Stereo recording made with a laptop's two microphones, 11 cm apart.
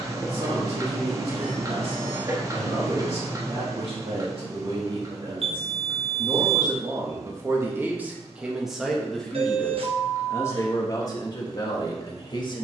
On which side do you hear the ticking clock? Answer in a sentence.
In this clip you hear the ticking clock on the right.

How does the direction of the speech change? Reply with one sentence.
In this clip you hear the speech move from right to left.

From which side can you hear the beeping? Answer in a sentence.
In this clip you hear the beeping on the right.